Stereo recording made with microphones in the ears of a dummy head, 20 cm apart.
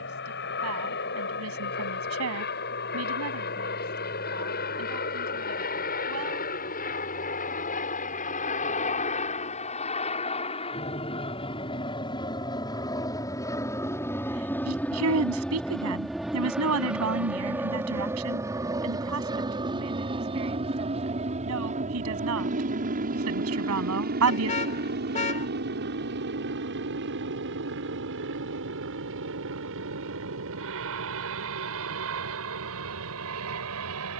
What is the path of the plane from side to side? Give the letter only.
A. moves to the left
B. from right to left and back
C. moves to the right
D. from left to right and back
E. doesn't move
C.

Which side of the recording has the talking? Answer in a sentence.
You can hear the talking on the right.